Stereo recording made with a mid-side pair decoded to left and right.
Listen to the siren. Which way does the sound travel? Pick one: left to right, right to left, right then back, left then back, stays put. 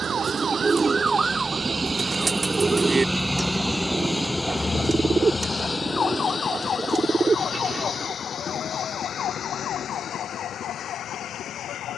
right to left.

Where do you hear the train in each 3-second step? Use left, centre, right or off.
right, centre, left, left.